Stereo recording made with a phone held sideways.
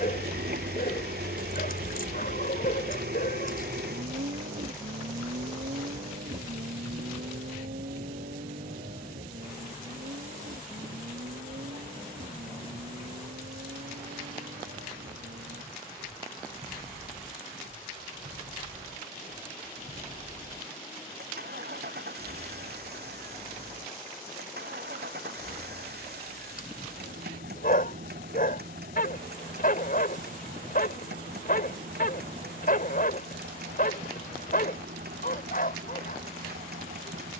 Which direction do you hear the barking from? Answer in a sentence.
In this clip you hear the barking on the left.